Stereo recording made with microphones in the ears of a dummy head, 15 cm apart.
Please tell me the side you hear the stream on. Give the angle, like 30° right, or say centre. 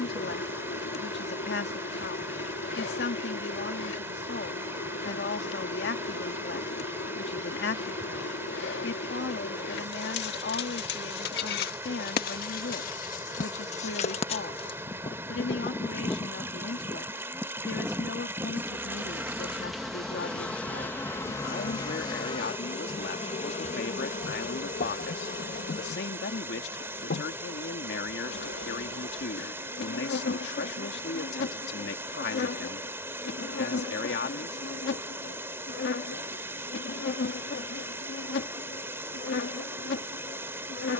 10° right.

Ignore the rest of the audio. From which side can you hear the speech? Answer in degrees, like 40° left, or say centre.
70° left.